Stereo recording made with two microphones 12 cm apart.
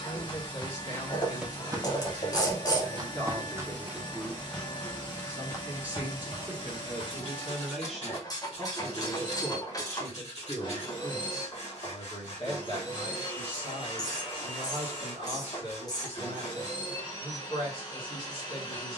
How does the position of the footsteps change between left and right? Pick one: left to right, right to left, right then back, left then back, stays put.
right then back.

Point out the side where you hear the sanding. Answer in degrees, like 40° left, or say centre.
60° left.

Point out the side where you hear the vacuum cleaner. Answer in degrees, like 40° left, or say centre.
40° left.